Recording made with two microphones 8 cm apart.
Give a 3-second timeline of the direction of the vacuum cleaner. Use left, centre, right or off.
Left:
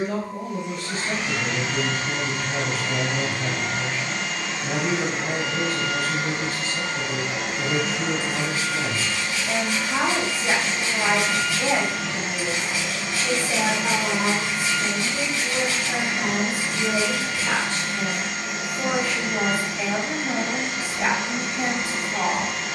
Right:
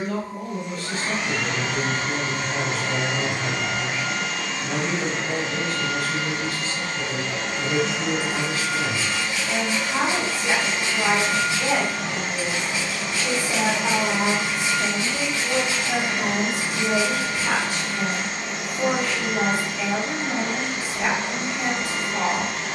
right, centre, centre, right, right, right, right, right.